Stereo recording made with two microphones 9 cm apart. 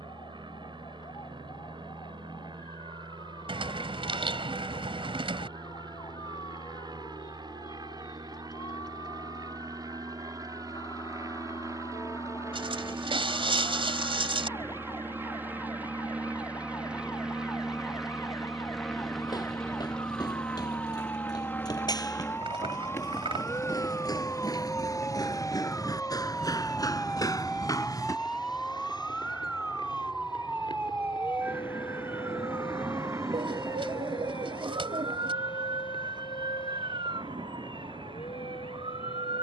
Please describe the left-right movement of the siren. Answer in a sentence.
In this clip you hear the siren travel towards the right.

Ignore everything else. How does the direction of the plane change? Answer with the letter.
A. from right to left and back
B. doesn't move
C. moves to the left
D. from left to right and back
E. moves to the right
C.